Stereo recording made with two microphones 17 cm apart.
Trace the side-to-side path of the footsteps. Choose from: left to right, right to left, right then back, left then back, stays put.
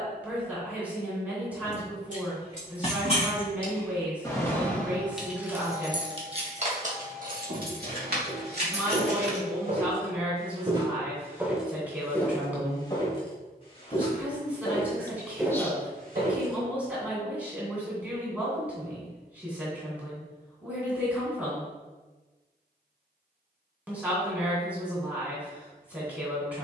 left then back.